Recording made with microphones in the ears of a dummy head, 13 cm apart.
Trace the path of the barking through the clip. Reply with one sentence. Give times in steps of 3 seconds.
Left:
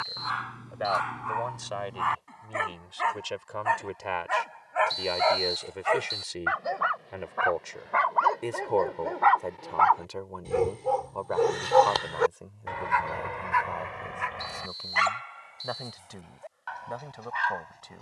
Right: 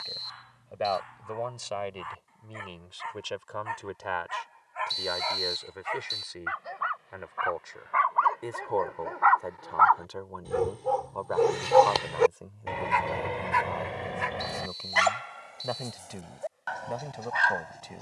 You can hear the barking on the left from 0 s, in the centre from 9 s and on the right from 12 s.